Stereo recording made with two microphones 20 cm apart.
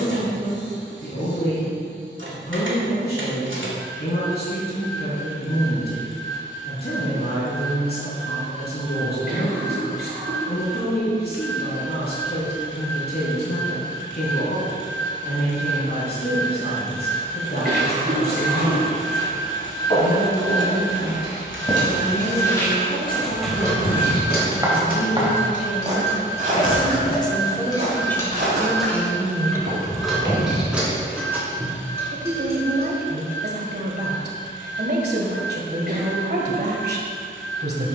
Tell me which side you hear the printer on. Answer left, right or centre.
right.